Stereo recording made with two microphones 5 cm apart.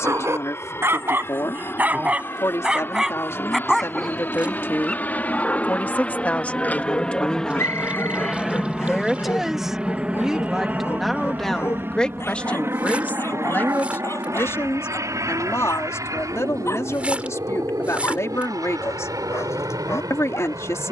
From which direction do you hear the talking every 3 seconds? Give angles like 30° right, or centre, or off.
60° left, 50° left, 20° left, centre, 40° left, 60° left, 60° left.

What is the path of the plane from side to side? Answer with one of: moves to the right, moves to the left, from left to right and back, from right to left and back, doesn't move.
moves to the right.